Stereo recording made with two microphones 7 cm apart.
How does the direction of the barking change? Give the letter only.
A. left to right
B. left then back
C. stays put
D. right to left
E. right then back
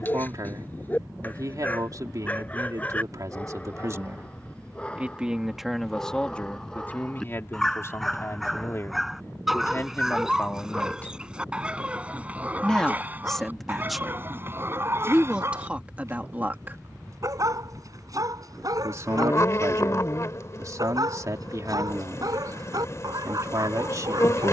A.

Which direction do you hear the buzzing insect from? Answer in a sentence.
You can hear the buzzing insect on the left.